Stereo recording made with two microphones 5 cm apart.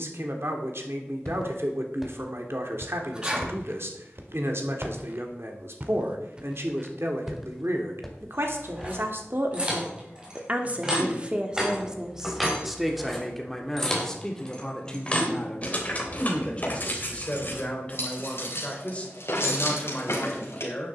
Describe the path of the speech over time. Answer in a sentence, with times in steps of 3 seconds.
In this clip you hear the speech on the right from 0 s, in the centre from 12 s and on the left from 15 s.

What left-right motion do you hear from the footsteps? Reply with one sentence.
You can hear the footsteps move from left to right and back again.